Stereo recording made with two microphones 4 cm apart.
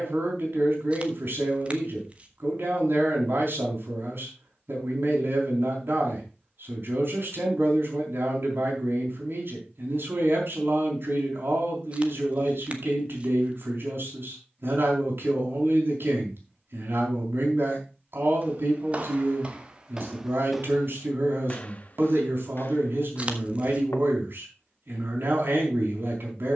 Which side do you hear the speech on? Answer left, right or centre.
right.